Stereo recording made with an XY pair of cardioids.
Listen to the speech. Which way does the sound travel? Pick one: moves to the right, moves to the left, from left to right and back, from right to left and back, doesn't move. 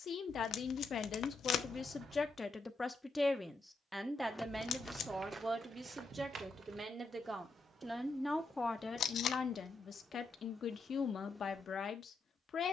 from left to right and back.